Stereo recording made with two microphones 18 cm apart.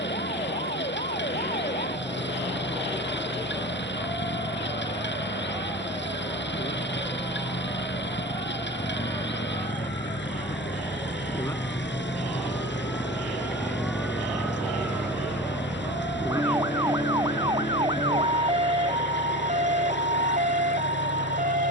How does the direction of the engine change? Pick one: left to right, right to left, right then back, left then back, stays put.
stays put.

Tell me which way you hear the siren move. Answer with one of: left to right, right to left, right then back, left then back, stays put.
left to right.